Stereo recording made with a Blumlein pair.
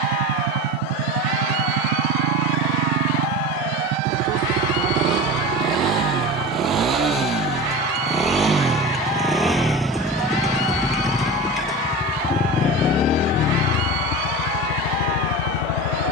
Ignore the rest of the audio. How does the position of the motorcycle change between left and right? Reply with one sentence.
You can hear the motorcycle go from the right side to the left.